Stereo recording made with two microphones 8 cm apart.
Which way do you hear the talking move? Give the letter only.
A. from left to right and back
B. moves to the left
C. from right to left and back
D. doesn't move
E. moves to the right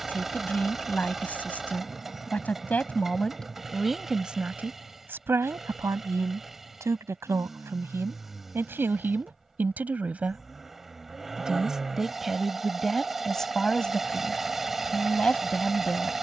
A.